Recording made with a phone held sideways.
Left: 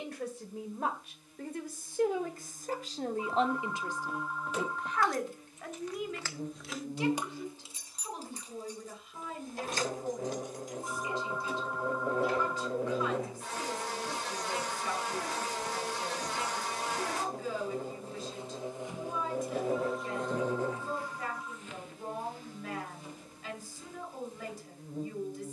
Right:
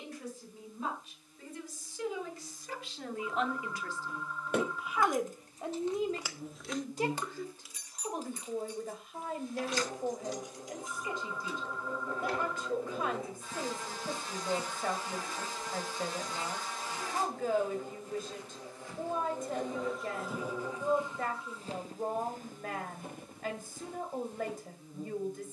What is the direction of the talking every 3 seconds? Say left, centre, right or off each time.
left, centre, right, right, right, right, right, right, right.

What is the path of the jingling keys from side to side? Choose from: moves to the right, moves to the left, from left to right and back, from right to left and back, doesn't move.
moves to the left.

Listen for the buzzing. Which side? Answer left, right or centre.
left.